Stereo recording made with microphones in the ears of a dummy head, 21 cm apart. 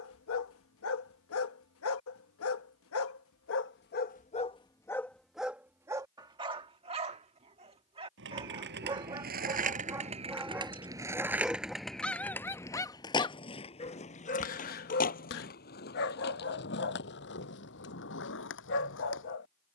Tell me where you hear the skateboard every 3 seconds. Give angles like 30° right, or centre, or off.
off, off, 50° right, 20° right, 20° left, 40° left, 50° left.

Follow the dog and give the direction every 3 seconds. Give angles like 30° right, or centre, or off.
60° left, 20° left, 20° right, 10° right, 20° left, 50° left, 50° left.